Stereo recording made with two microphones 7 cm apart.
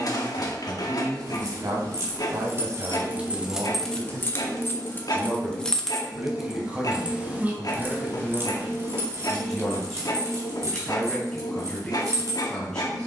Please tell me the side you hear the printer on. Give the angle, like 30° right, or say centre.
60° left.